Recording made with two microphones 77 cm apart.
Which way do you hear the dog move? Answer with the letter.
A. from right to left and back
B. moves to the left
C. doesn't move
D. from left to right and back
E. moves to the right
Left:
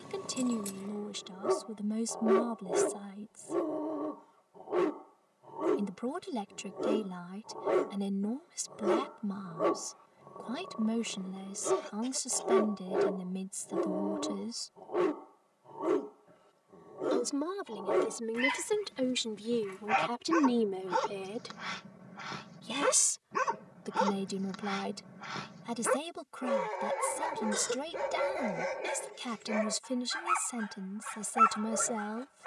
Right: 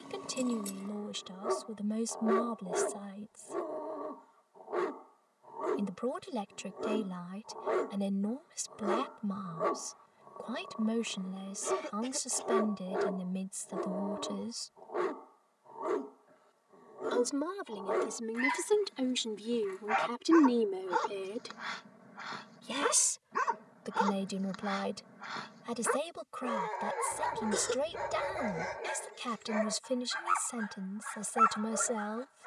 C.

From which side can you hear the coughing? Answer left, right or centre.
right.